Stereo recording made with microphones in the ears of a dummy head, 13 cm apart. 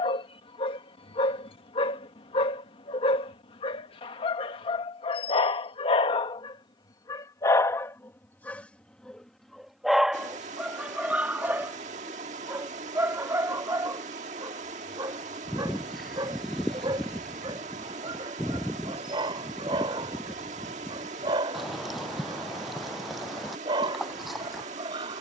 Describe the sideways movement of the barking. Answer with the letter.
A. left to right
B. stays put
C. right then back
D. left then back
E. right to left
A.